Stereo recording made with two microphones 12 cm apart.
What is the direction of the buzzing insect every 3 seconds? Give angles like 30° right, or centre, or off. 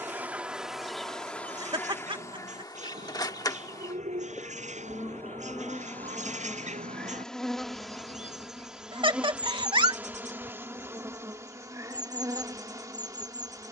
10° left, 20° left, centre, 20° right, 30° right.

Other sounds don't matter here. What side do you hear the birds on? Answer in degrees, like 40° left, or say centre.
70° right.